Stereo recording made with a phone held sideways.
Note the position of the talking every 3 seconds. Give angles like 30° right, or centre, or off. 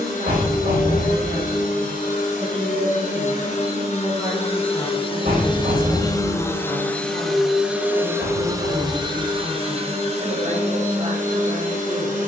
50° right, 20° right, 30° left, 30° right.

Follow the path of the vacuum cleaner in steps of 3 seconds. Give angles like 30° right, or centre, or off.
60° left, 40° left, centre, 50° right.